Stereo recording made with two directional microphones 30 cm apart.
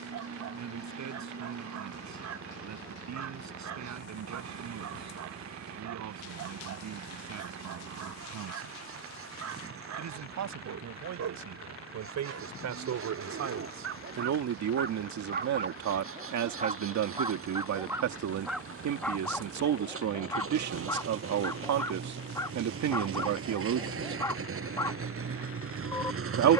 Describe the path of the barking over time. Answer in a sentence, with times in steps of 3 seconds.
In this clip you hear the barking on the right from 0 s and in the centre from 18 s.